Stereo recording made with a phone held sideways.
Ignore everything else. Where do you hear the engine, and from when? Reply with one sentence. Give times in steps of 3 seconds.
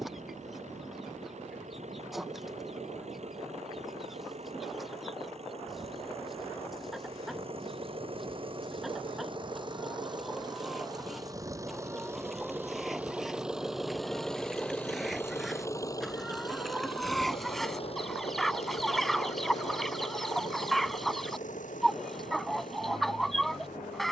You can hear the engine on the right from 0 s, in the centre from 12 s and on the left from 15 s.